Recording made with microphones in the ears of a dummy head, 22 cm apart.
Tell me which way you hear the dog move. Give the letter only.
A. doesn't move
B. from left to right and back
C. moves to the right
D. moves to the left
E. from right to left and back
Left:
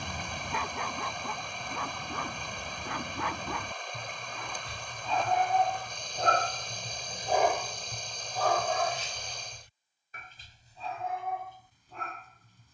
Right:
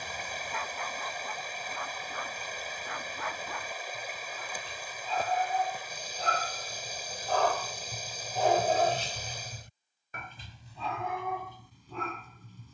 C.